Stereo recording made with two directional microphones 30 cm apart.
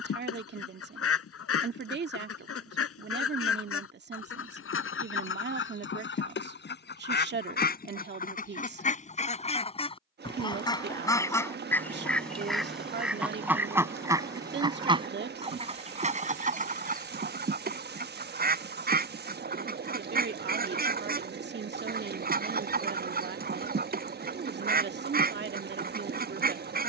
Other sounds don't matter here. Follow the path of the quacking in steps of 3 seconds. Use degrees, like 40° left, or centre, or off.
50° left, 40° left, 30° left, 10° left, 10° right, 30° right, 30° right, 30° right, 30° right.